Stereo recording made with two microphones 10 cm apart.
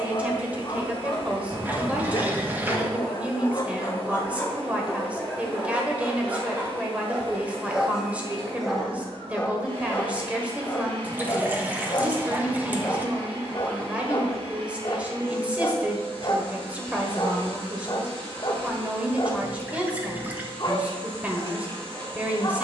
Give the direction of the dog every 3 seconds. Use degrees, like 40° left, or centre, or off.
50° left, 20° left, 10° right, 20° left, 40° left, 50° left, 50° left, 50° left.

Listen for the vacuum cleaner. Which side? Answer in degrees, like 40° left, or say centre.
70° right.